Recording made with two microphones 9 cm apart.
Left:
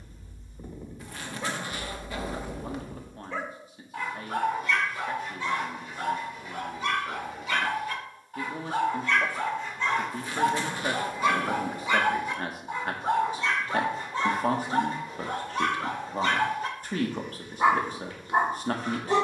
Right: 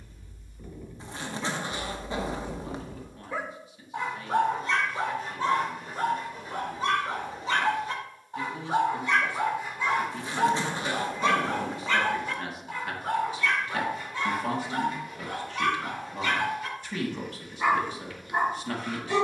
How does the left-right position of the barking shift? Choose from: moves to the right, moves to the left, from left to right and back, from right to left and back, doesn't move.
from left to right and back.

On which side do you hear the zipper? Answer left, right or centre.
right.